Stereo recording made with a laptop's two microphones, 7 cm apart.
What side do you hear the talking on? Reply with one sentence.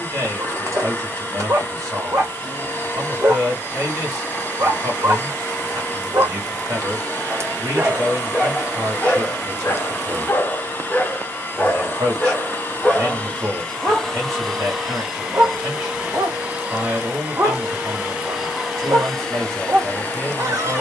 You can hear the talking on the right.